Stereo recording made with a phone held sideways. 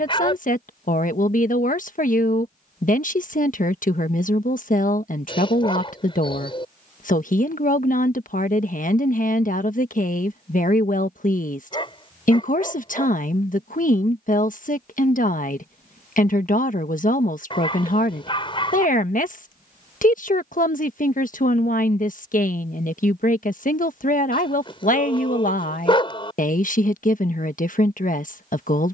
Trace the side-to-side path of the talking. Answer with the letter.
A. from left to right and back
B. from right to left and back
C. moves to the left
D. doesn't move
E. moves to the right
D.